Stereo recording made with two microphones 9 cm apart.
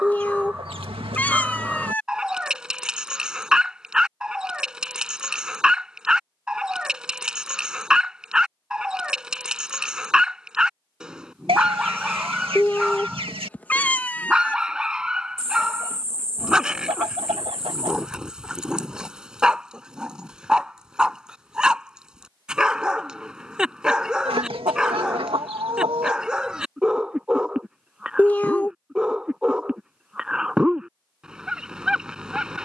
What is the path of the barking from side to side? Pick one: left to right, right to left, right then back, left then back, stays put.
stays put.